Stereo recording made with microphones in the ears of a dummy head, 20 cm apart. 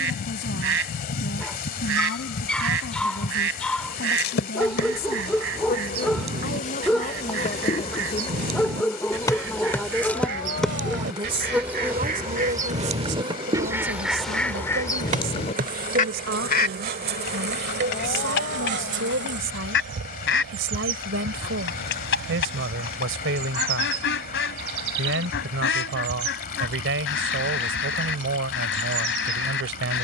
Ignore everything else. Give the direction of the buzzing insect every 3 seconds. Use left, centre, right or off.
left, left, left, centre, right, right, right, right, right, right.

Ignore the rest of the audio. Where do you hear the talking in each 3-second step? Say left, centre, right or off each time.
left, left, left, centre, right, right, right, right, right, right.